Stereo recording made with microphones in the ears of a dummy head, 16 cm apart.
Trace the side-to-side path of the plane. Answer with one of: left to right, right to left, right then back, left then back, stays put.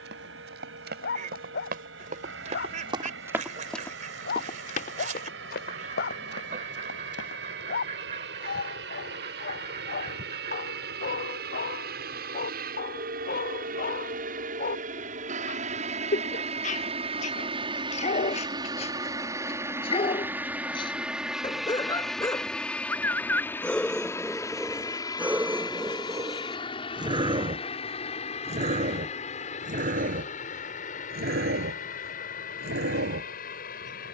right to left.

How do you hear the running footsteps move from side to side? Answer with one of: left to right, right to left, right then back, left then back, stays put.
right to left.